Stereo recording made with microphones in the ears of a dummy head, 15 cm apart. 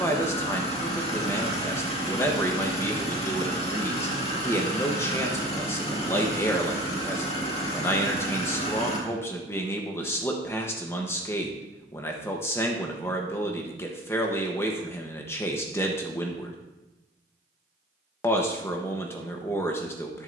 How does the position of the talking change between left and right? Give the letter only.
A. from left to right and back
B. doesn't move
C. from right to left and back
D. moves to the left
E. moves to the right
B.